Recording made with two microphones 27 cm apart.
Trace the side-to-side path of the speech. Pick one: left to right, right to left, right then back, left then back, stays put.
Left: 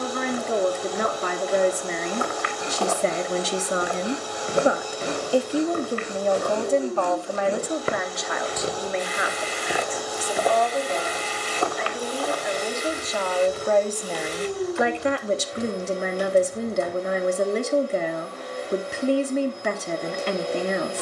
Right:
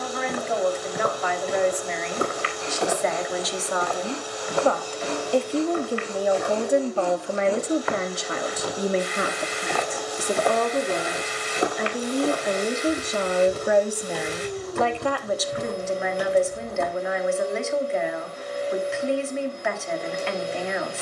right then back.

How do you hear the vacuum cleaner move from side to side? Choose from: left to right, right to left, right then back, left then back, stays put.
stays put.